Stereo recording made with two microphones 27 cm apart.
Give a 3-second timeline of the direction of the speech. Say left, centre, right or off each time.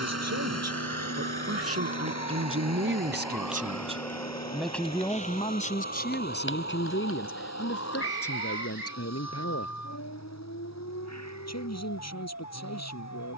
right, centre, left, left, left.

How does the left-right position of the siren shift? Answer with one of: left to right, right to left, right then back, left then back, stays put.
right to left.